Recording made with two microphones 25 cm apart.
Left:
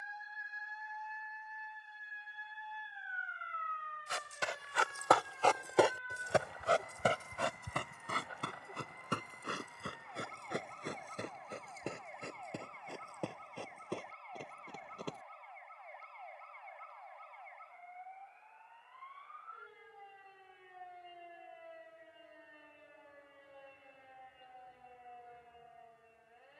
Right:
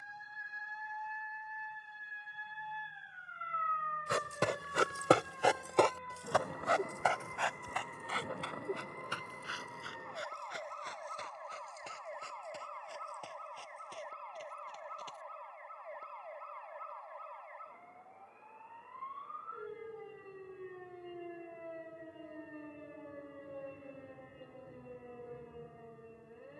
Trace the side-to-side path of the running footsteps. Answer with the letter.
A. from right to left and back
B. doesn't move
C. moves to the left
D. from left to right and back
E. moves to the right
C.